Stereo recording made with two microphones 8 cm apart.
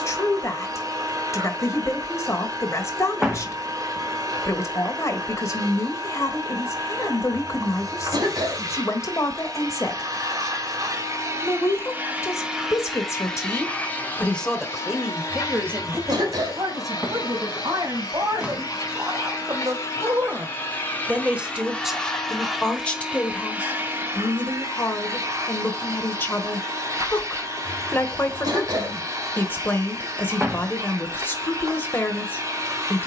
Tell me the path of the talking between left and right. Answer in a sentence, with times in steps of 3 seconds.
In this clip you hear the talking on the left from 0 s, on the right from 15 s, in the centre from 21 s and on the left from 24 s.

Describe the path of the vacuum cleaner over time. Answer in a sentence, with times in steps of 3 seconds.
In this clip you hear the vacuum cleaner on the right from 0 s, in the centre from 12 s, on the left from 15 s, in the centre from 21 s and on the right from 24 s.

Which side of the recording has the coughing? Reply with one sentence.
You can hear the coughing on the right.